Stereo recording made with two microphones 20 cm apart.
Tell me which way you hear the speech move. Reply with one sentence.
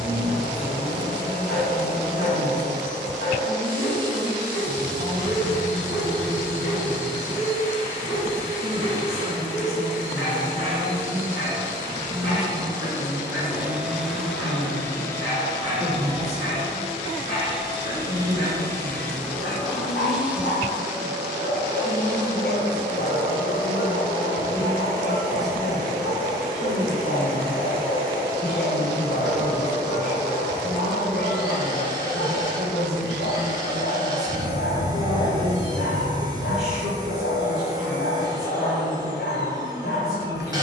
You can hear the speech stay put.